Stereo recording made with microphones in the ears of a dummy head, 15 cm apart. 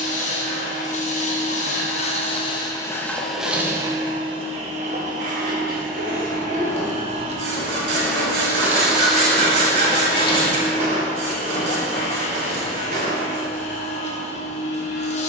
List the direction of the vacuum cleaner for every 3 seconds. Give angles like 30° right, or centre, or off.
40° left, 30° right, 30° right, 30° left, 40° left.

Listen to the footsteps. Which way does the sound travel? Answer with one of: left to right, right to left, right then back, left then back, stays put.
left to right.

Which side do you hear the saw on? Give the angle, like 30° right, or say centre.
80° right.